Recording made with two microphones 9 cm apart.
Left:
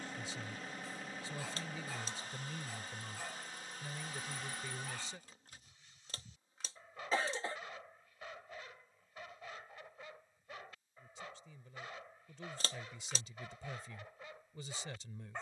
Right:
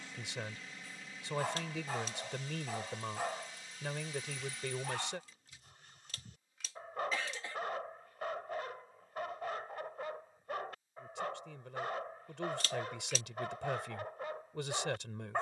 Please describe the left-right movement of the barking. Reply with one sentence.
In this clip you hear the barking stay in one place.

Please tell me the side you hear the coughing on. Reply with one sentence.
You can hear the coughing on the left.